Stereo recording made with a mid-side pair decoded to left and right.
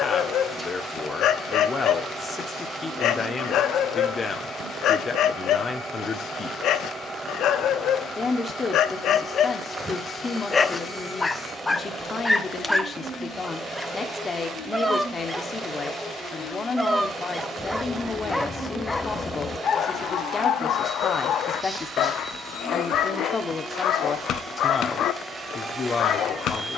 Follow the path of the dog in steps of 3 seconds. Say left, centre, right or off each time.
left, left, left, left, centre, centre, left, left, left.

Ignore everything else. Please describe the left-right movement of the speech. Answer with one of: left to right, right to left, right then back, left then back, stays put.
stays put.